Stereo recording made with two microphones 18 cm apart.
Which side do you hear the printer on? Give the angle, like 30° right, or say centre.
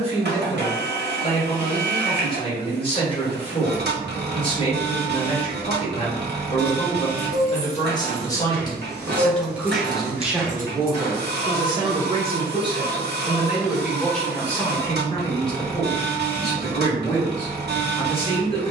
70° right.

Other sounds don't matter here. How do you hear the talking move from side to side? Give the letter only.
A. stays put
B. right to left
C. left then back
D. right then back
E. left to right
D.